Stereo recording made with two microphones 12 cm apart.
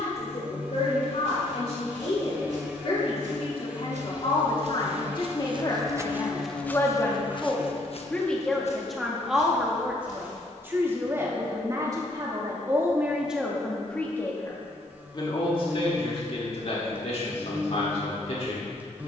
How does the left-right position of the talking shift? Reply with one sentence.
You can hear the talking go right and come back.